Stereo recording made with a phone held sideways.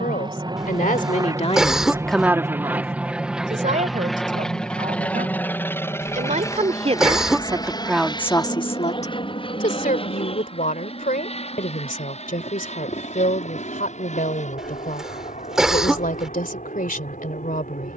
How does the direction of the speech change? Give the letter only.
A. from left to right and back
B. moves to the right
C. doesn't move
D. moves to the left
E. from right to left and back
A.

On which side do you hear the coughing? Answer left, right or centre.
centre.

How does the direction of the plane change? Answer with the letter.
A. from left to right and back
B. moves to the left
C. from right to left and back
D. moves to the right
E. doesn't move
B.